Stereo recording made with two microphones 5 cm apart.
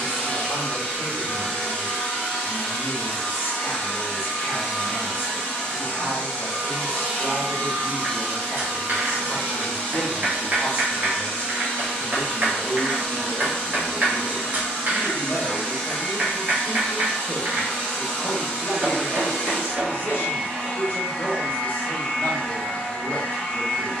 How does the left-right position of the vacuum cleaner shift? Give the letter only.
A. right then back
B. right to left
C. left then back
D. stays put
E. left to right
D.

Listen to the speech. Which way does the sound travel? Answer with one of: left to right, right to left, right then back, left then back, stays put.
stays put.